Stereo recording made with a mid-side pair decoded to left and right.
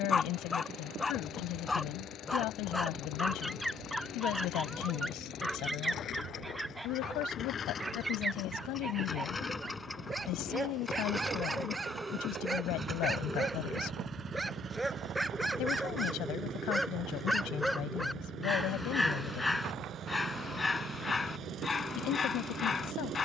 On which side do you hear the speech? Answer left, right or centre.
left.